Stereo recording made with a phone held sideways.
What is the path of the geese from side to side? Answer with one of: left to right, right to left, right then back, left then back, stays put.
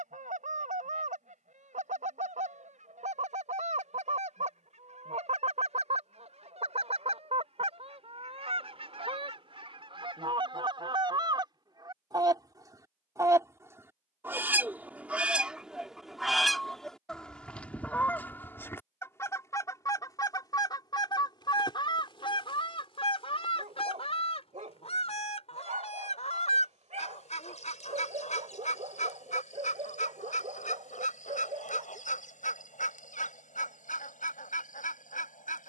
right to left.